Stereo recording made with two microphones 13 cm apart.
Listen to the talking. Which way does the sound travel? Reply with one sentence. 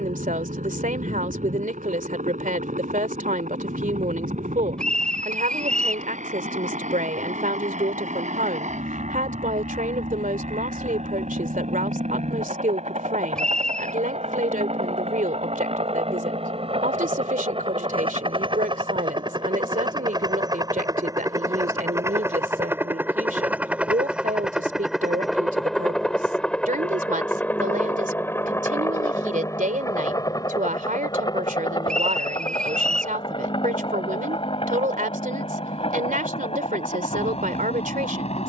In this clip you hear the talking stay put.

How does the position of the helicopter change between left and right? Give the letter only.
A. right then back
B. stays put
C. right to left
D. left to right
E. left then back
C.